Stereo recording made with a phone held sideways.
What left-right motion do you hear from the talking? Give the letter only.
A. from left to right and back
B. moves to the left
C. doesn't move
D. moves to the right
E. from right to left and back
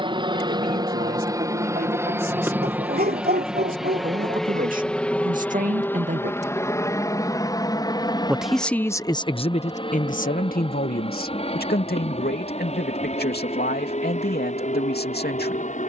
B.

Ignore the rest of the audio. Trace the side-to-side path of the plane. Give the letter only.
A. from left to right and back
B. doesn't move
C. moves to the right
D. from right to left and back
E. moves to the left
E.